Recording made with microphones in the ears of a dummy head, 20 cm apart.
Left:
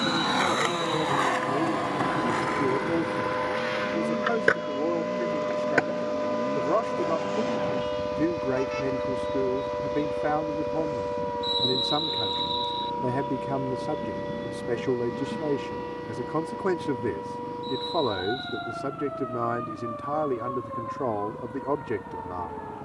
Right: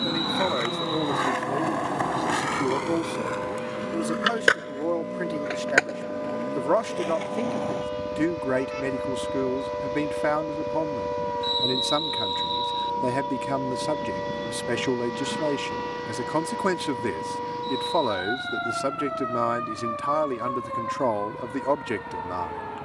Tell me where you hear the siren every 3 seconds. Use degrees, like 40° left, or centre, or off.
50° left, 30° left, 10° left, 10° right, 30° right, 40° right, 50° right, 60° right.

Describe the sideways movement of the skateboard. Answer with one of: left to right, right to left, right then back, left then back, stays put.
left to right.